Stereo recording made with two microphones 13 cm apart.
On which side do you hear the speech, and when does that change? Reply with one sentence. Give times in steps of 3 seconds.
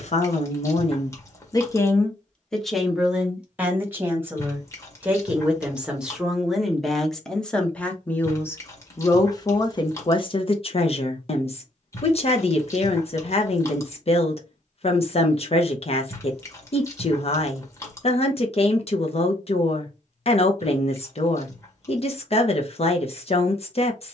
You can hear the speech on the left from 0 s, in the centre from 3 s and on the left from 9 s.